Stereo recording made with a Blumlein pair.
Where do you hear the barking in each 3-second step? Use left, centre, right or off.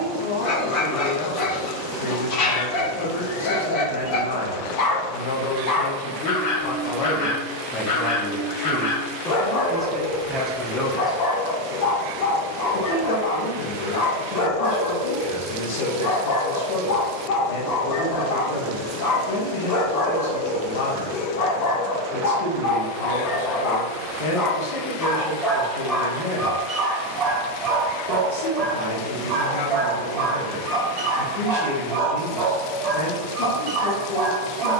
left, left, left, left, left, left, left, left, centre, right, right, right.